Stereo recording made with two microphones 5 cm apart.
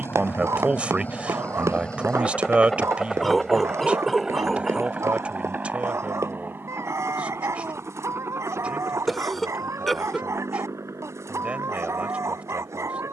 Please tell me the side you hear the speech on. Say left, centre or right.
right.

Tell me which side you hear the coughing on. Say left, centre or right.
centre.